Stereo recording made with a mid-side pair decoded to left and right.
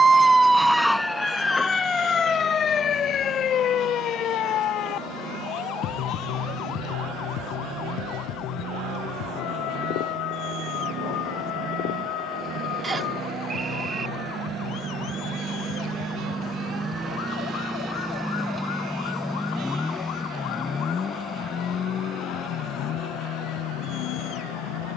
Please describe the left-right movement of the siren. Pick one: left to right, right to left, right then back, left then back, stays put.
right to left.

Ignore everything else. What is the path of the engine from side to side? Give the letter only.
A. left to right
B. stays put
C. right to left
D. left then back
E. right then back
C.